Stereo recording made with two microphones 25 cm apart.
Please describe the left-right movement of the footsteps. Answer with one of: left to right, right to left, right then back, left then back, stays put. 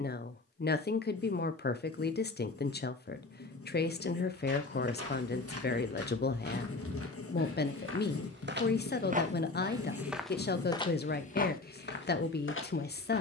right to left.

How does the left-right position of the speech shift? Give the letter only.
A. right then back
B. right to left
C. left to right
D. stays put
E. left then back
D.